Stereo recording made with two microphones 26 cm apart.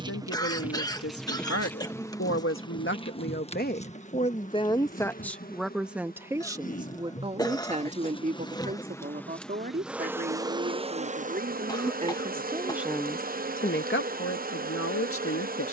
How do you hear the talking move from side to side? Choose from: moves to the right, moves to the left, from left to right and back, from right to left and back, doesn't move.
from left to right and back.